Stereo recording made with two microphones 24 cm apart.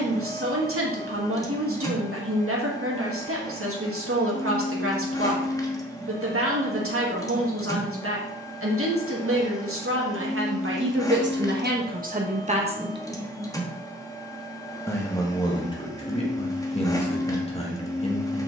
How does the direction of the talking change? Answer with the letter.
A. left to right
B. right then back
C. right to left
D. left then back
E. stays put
C.